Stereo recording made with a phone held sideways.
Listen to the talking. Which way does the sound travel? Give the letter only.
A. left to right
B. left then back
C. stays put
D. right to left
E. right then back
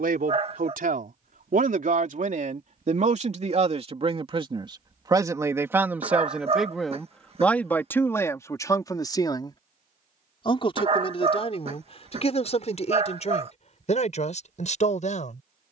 D.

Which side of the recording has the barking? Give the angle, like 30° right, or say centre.
40° right.